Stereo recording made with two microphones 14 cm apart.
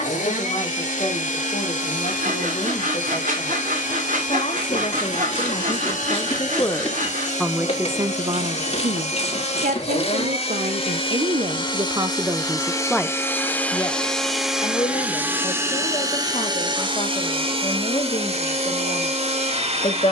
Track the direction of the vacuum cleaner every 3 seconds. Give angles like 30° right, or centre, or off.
60° left, 60° left, 60° left, 40° left, 10° left, 30° right, 50° right.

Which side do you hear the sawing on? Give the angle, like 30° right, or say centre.
70° right.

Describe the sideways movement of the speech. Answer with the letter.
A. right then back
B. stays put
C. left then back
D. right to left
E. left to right
A.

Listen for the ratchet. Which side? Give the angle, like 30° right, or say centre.
50° left.